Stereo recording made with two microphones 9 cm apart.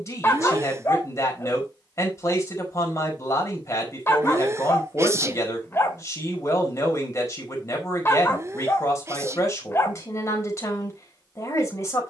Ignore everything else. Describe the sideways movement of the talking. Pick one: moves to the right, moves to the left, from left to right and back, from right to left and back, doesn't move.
doesn't move.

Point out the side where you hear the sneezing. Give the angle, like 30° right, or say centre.
30° right.